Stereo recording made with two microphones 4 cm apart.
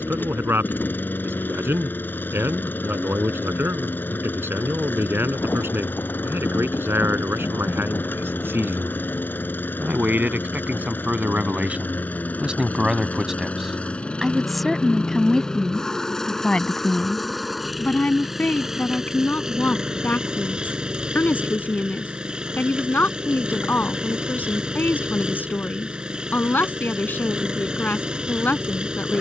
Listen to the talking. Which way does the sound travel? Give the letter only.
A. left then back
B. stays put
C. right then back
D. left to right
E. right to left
E.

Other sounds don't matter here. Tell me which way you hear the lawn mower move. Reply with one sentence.
You can hear the lawn mower go from the left side to the right.